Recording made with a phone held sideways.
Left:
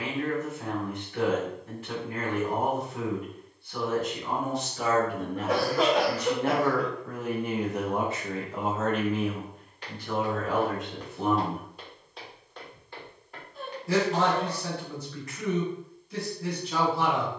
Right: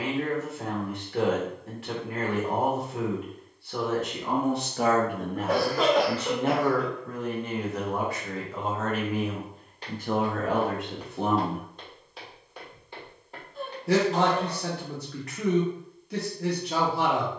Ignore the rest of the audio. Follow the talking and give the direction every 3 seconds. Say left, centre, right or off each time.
right, right, centre, right, right, right.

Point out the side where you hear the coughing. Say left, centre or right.
centre.